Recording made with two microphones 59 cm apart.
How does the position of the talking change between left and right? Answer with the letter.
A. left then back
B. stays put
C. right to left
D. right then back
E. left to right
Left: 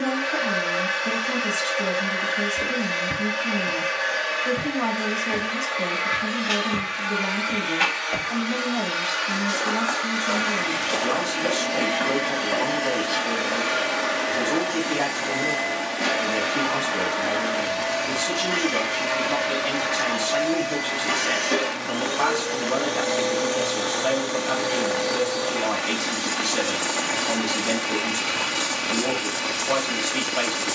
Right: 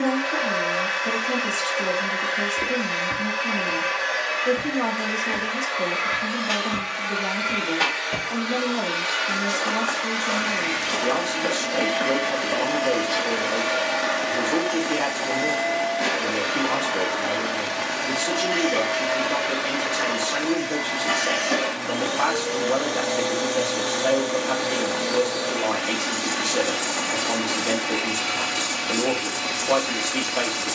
B.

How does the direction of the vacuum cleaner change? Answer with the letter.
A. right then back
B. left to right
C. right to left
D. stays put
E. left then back
E.